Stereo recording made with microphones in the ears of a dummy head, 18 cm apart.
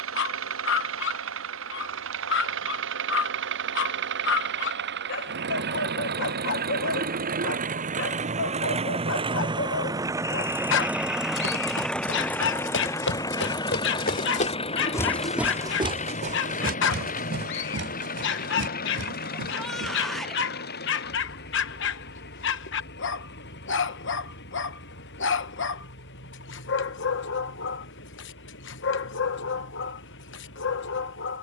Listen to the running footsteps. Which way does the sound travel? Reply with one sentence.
You can hear the running footsteps move to the right.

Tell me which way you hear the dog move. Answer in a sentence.
In this clip you hear the dog stay put.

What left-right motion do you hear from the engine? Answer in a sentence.
You can hear the engine go from the right side to the left.